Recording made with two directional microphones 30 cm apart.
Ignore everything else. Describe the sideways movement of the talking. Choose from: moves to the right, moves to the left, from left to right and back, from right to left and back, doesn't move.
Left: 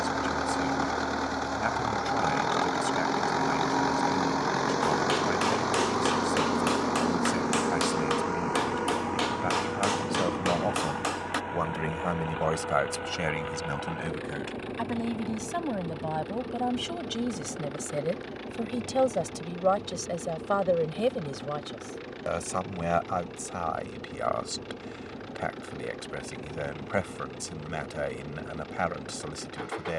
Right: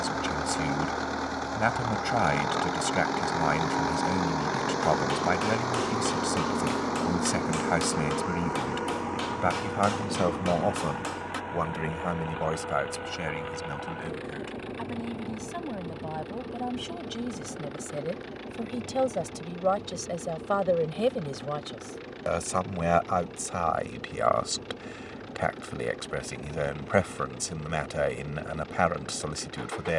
from right to left and back.